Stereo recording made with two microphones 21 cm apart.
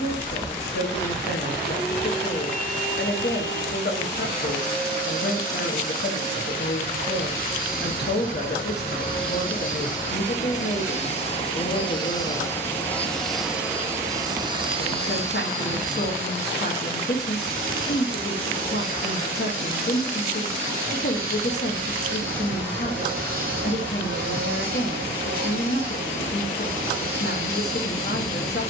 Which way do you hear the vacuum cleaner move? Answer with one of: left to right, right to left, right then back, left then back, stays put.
left to right.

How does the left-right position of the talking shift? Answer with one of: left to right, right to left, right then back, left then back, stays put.
stays put.